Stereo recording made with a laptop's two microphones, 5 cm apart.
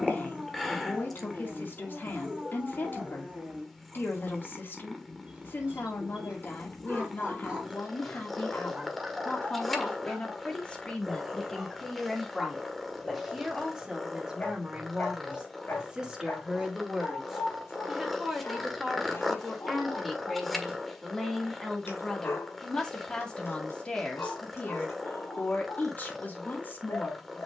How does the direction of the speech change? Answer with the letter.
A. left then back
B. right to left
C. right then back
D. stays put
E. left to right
C.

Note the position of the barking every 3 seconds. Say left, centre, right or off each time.
right, right, right, centre, left, left, left, left, left.